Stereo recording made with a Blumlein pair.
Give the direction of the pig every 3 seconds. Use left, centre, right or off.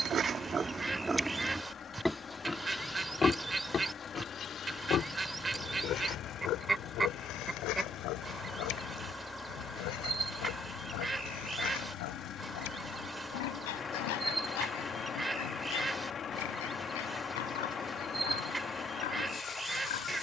centre, left, left, left, left, left, left.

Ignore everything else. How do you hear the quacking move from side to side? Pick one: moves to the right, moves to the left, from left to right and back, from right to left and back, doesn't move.
doesn't move.